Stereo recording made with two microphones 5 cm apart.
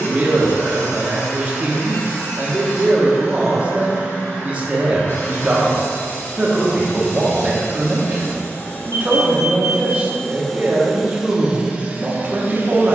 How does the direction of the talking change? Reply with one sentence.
You can hear the talking stay put.